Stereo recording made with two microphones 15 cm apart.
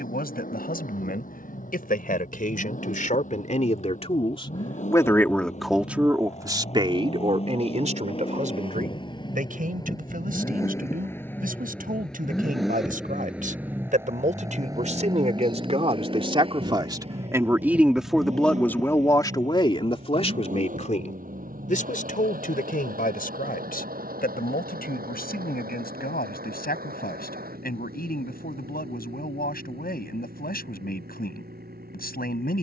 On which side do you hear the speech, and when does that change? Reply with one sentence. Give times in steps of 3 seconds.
You can hear the speech on the left from 0 s, on the right from 6 s and on the left from 18 s.